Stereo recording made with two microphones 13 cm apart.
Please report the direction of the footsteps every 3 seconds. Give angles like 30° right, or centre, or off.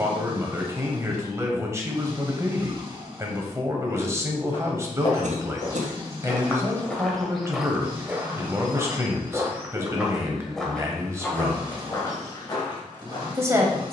off, 40° left, centre, centre, 30° left.